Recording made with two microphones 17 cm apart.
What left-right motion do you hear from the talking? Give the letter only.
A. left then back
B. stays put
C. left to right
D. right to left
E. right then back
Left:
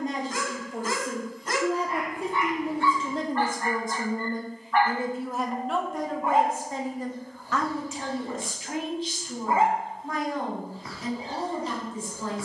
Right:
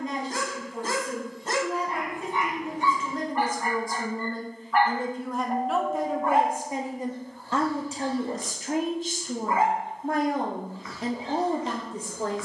C.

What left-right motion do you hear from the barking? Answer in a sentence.
In this clip you hear the barking go from the right side to the left.